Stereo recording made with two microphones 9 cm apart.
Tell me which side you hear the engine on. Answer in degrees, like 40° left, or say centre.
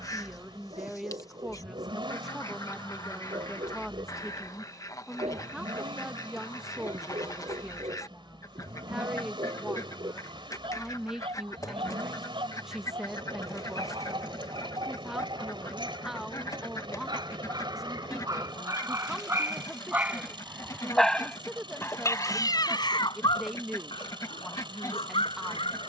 60° right.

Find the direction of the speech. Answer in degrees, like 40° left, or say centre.
10° right.